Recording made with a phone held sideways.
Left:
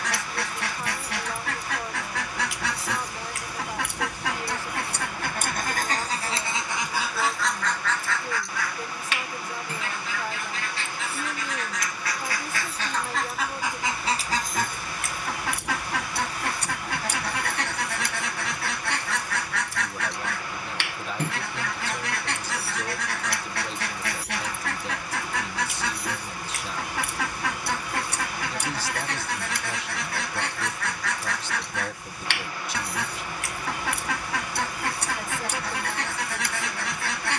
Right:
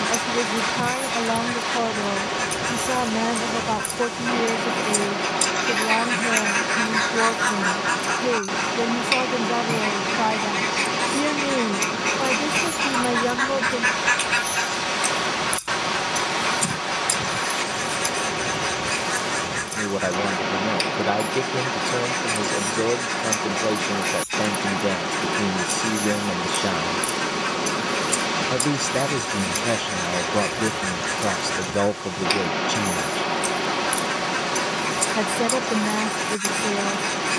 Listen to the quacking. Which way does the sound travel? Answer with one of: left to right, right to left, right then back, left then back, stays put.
right then back.